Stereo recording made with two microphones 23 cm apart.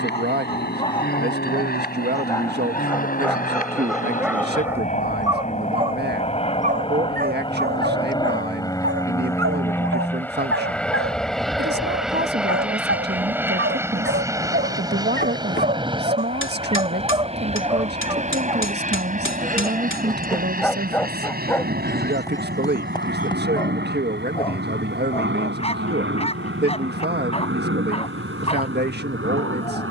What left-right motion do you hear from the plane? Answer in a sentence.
In this clip you hear the plane go from the left side to the right.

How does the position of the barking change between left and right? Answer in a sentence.
In this clip you hear the barking go right and come back.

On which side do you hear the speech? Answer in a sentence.
In this clip you hear the speech on the right.